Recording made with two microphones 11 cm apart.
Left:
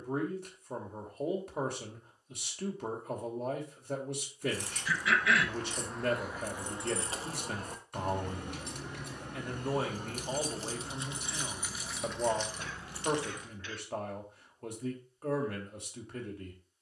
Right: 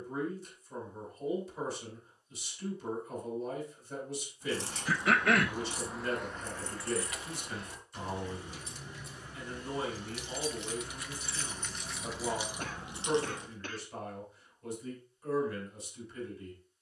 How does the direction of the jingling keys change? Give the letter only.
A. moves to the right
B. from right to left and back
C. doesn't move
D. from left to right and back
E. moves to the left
B.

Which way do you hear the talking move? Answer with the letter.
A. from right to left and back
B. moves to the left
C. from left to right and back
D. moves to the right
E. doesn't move
E.